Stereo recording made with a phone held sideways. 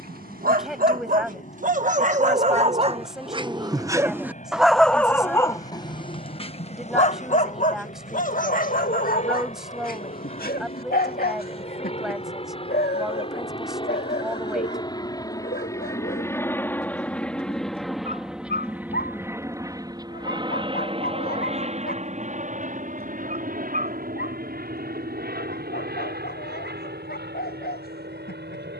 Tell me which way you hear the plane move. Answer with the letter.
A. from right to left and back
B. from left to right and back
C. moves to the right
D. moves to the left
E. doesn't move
C.